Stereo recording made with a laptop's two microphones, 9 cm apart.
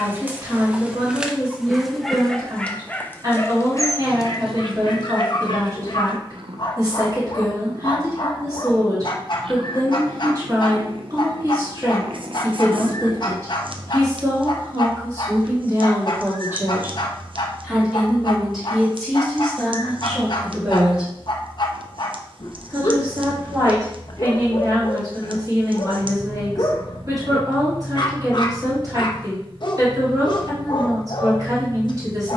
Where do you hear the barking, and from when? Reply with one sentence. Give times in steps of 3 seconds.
You can hear the barking in the centre from 0 s and on the left from 3 s.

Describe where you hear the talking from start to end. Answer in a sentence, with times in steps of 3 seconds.
You can hear the talking on the right from 0 s, in the centre from 18 s and on the right from 21 s.